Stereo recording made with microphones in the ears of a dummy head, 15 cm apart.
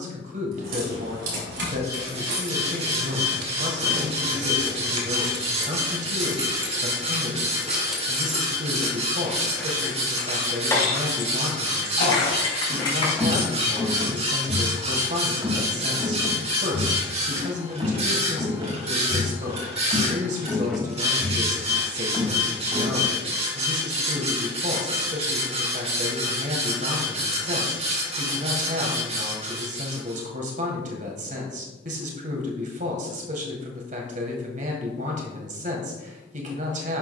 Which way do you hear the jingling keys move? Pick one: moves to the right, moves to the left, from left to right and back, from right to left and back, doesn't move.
moves to the left.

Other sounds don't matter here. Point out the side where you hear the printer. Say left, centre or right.
right.